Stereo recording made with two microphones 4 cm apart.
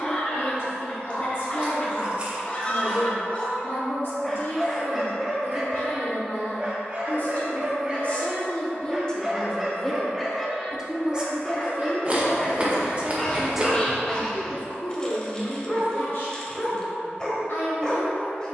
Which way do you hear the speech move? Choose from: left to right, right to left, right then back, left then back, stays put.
right then back.